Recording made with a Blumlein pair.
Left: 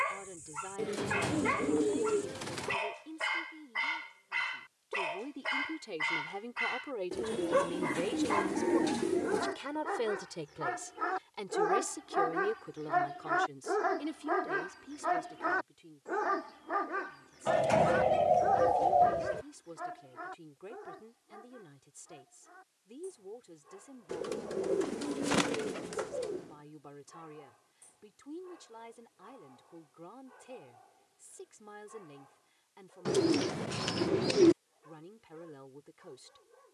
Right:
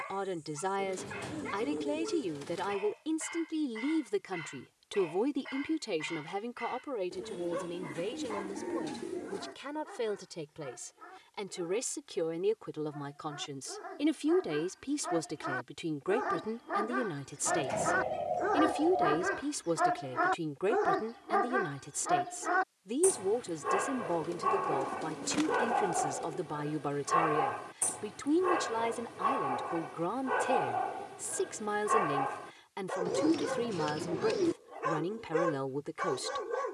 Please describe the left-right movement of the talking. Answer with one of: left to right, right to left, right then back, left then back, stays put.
left then back.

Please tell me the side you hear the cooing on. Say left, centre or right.
left.